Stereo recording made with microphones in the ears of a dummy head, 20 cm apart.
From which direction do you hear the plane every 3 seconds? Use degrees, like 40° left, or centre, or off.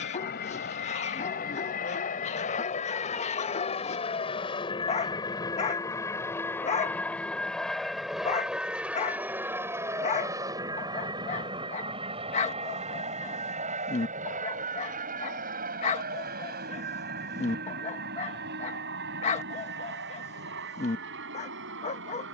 40° left, 20° left, centre, 20° right, 30° right, 40° right, 50° right, 50° right.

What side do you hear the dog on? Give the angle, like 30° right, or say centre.
30° left.